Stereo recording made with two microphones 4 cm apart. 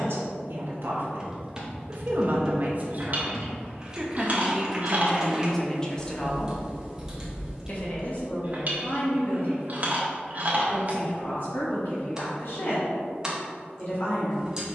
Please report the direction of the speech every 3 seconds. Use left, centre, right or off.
right, centre, left, left, left.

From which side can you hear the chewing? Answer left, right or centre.
right.